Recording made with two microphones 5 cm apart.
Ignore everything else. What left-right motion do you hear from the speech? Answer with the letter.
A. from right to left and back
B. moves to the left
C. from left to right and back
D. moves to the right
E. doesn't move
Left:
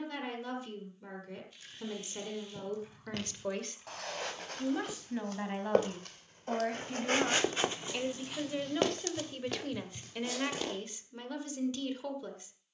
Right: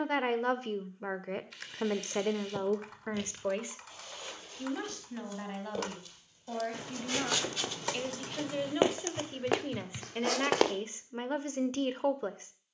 A.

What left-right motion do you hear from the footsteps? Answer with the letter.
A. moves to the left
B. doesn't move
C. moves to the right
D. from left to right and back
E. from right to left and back
C.